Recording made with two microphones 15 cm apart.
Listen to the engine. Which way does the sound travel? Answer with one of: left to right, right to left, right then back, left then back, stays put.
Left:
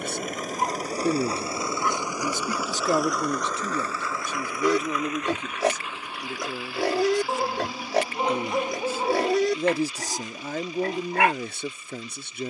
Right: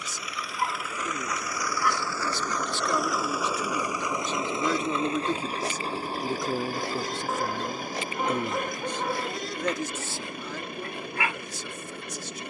left to right.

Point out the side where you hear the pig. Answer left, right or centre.
left.